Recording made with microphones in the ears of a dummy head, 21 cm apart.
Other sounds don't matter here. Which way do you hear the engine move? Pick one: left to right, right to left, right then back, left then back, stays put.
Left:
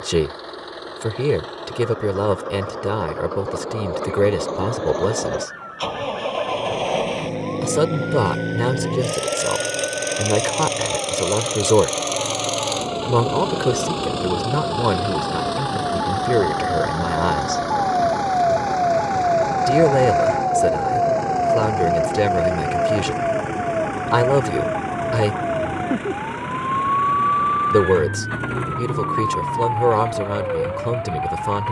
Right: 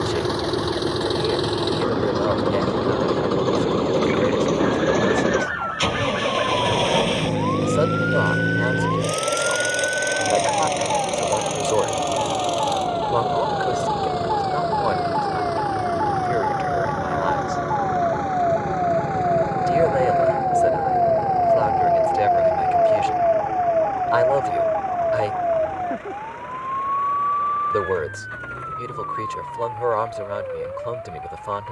right to left.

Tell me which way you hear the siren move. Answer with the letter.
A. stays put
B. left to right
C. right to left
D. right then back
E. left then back
C.